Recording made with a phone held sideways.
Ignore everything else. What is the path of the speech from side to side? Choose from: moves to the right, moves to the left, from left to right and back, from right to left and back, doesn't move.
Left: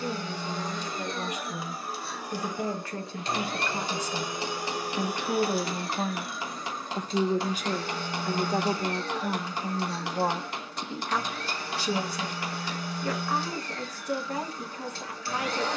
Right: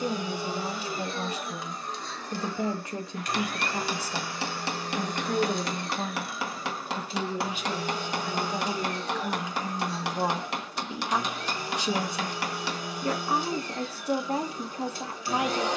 from right to left and back.